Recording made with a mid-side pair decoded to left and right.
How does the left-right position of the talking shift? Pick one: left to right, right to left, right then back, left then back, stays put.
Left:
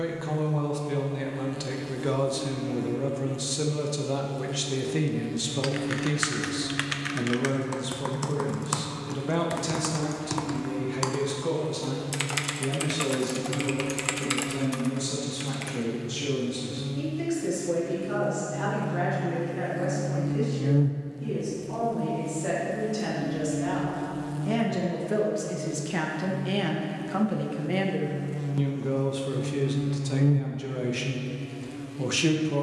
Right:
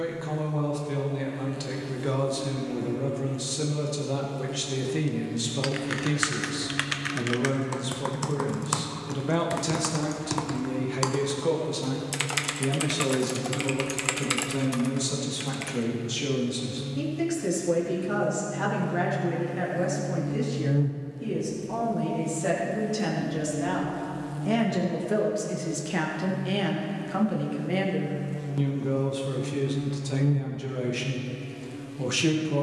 right then back.